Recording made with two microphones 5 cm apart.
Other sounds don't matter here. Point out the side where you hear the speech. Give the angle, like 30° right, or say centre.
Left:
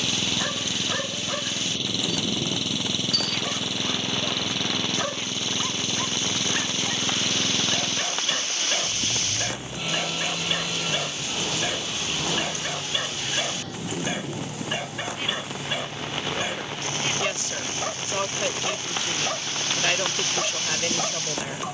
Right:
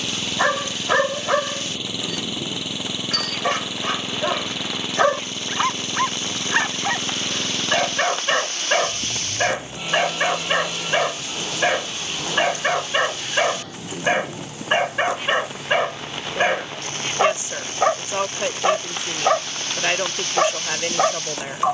20° right.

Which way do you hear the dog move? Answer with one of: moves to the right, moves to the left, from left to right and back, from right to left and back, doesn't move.
doesn't move.